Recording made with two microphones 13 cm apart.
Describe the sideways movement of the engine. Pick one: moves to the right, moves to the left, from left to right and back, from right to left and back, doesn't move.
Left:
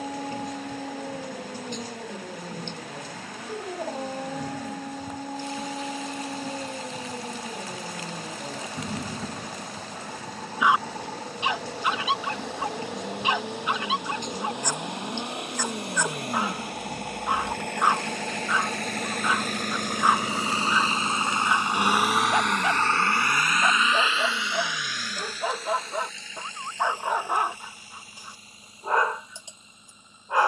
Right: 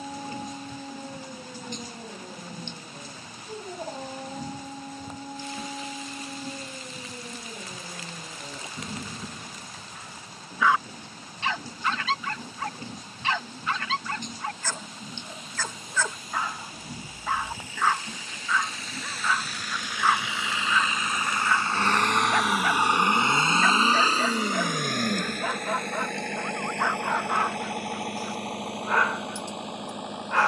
moves to the right.